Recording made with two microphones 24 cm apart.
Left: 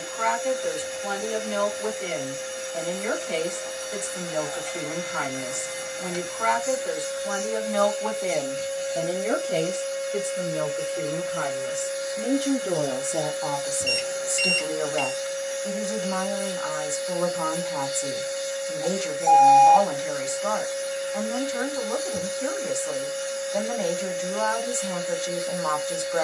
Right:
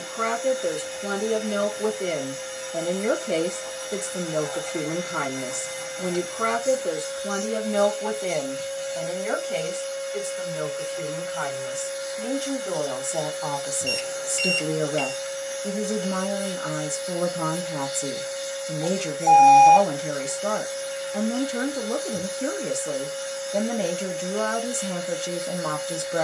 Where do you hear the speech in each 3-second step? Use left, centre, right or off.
right, right, right, left, centre, right, right, right, right.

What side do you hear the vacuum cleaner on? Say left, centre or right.
left.